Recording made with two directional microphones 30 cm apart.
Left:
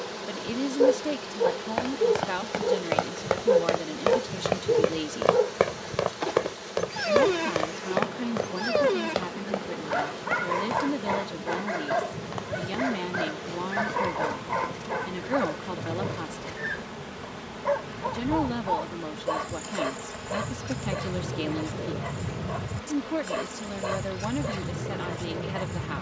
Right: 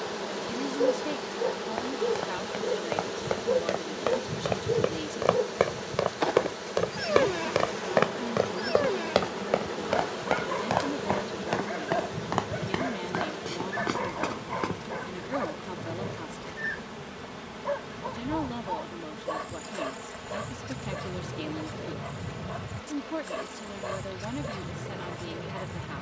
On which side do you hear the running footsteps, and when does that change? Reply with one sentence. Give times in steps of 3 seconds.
In this clip you hear the running footsteps on the left from 0 s, in the centre from 6 s, on the right from 9 s and not at all from 15 s.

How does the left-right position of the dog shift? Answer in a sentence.
You can hear the dog stay put.